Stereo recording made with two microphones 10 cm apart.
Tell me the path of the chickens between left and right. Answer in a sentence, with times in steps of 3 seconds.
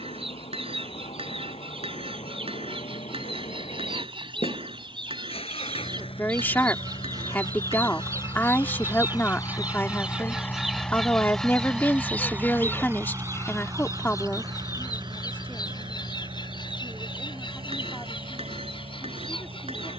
In this clip you hear the chickens on the right from 0 s, in the centre from 9 s and on the left from 12 s.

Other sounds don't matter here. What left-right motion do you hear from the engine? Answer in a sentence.
In this clip you hear the engine go from the left side to the right.